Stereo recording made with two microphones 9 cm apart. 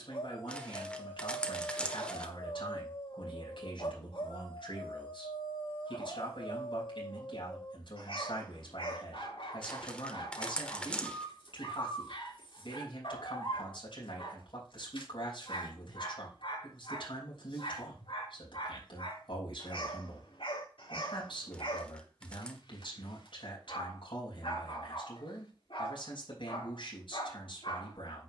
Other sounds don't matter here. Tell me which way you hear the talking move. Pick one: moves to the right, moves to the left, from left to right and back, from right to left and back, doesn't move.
doesn't move.